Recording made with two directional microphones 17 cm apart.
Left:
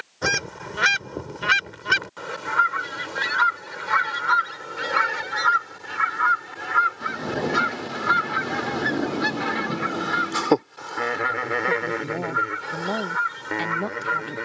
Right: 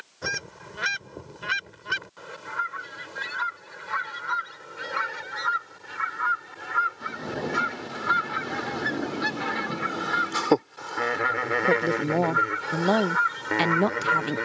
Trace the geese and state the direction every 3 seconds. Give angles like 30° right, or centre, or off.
50° left, 50° left, 30° left, 10° left, centre.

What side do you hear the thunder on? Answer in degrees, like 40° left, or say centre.
30° left.